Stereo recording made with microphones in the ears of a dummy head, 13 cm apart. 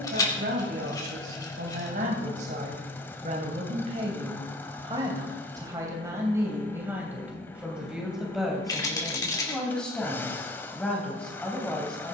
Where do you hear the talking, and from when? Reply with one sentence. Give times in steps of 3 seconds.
You can hear the talking on the right from 0 s and in the centre from 6 s.